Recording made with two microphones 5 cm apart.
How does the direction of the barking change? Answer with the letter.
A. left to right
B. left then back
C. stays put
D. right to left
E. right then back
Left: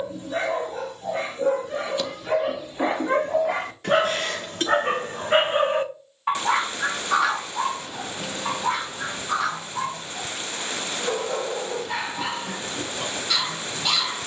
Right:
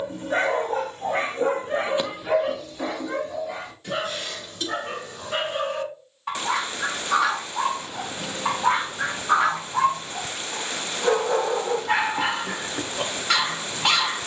B.